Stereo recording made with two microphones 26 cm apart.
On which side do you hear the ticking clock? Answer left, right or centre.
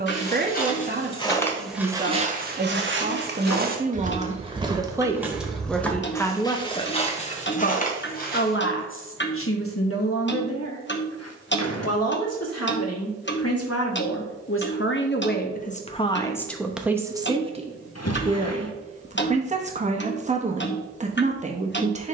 left.